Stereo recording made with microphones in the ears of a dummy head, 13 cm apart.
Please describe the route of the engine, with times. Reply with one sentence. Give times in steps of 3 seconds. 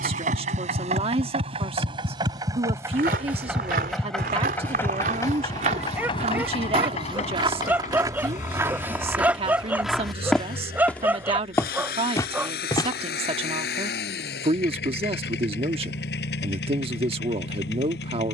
In this clip you hear the engine on the right from 0 s, in the centre from 3 s and on the left from 6 s.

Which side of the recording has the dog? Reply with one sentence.
In this clip you hear the dog in the centre.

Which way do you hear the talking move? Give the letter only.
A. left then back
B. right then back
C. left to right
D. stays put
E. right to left
D.